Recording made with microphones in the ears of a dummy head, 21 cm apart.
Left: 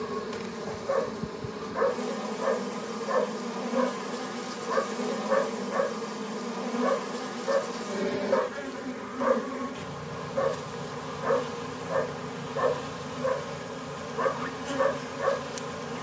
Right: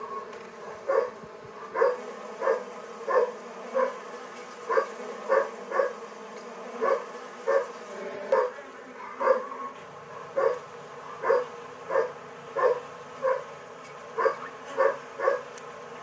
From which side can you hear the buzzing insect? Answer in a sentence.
You can hear the buzzing insect on the left.